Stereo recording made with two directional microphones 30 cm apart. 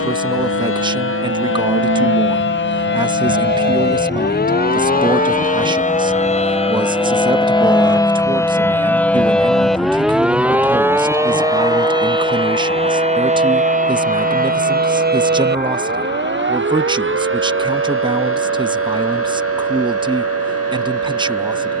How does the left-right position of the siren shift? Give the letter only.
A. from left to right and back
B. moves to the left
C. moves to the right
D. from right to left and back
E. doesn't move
C.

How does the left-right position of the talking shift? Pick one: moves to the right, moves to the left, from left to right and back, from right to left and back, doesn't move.
doesn't move.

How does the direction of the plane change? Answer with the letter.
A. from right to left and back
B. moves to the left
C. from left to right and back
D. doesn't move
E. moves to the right
B.